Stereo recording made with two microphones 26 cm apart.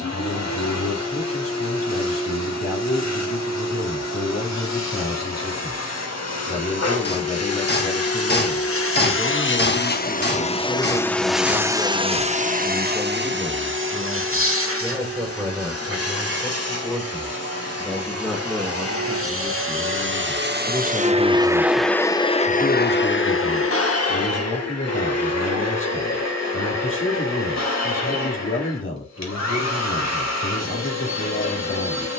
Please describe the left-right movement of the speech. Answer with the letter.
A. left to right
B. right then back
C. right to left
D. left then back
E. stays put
B.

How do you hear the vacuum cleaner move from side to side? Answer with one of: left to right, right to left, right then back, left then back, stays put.
right then back.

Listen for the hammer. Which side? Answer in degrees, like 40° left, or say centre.
40° left.